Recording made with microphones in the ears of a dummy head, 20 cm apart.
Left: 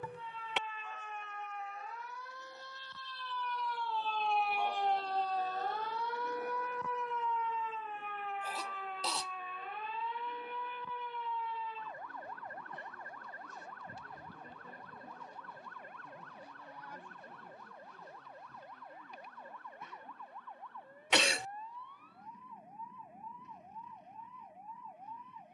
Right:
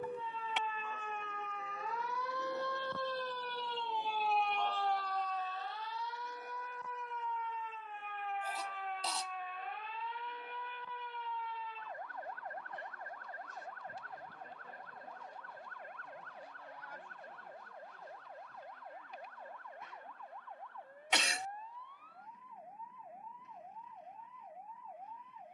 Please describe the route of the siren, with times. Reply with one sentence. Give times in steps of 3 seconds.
You can hear the siren on the right from 0 s, in the centre from 3 s and on the left from 6 s.